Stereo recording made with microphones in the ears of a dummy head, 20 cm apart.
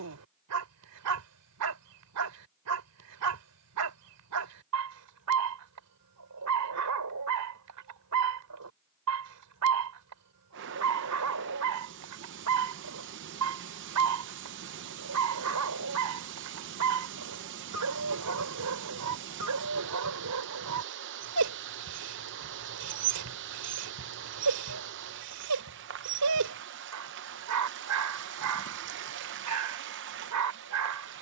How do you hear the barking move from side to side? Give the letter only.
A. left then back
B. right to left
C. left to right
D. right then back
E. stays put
E.